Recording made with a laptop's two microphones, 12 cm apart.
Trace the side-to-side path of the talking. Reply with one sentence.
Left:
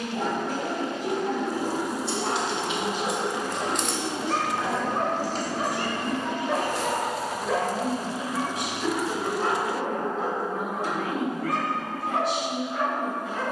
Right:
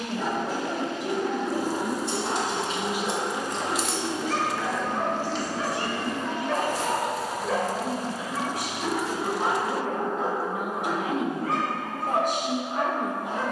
In this clip you hear the talking go left and come back.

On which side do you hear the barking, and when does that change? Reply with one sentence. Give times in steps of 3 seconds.
In this clip you hear the barking on the left from 0 s, in the centre from 6 s and on the right from 9 s.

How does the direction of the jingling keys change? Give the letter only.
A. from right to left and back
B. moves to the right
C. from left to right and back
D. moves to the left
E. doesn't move
D.